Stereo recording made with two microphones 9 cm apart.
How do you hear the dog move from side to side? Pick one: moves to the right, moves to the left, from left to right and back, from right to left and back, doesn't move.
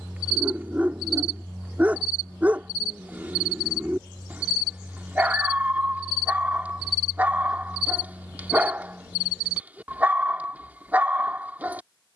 doesn't move.